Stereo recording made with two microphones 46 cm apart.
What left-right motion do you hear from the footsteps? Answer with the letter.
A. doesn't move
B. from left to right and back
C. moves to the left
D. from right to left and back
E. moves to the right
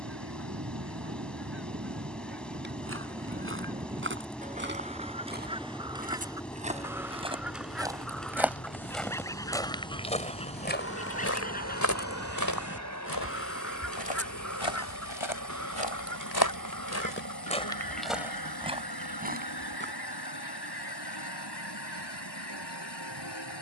D.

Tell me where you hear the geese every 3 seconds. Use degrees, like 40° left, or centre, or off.
30° right, 20° right, centre, 10° left, 30° left, 40° left, 50° left, 60° left.